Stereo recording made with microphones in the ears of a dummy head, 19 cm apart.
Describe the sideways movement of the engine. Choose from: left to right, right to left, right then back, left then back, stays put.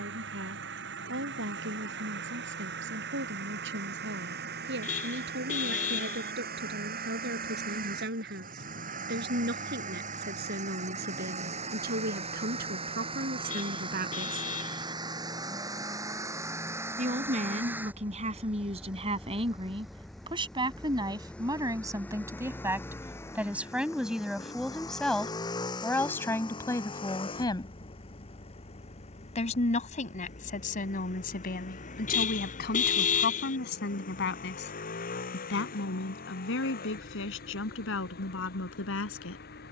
right to left.